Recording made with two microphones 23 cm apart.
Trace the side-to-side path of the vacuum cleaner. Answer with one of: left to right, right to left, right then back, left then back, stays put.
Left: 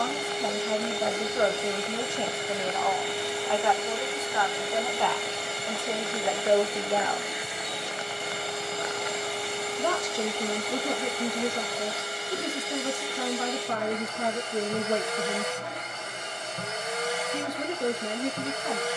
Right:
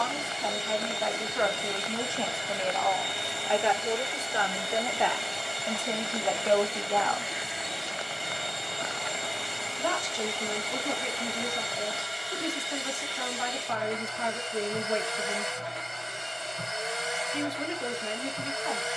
stays put.